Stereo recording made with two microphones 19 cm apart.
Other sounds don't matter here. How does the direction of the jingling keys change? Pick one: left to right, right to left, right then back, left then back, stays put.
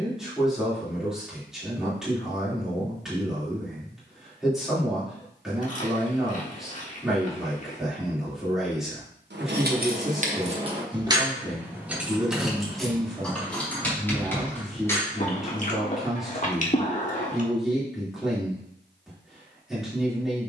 right to left.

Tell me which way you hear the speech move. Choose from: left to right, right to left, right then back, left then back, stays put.
stays put.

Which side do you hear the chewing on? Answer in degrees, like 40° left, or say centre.
40° left.